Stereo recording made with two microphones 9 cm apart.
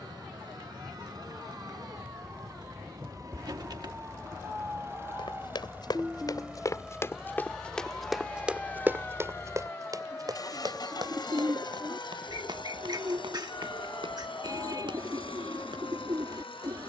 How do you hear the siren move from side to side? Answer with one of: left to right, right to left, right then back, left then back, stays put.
right to left.